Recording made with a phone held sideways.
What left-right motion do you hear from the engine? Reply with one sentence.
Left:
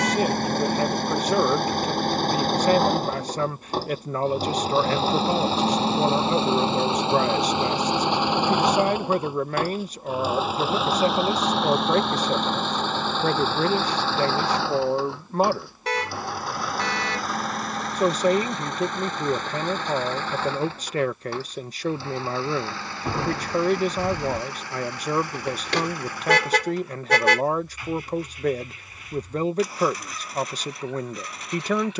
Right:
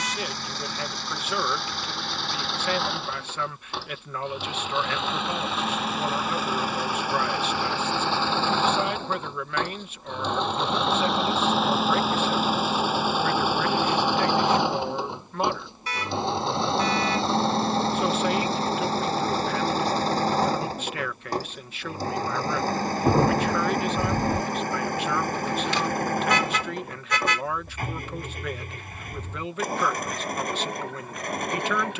In this clip you hear the engine move to the right.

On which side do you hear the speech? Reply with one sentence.
In this clip you hear the speech on the left.